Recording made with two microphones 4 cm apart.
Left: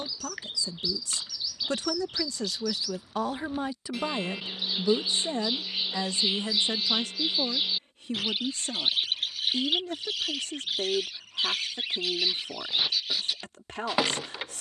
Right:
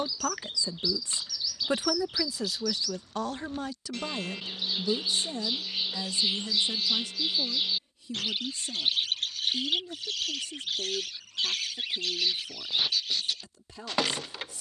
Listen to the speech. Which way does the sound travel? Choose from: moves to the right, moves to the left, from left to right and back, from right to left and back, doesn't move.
moves to the left.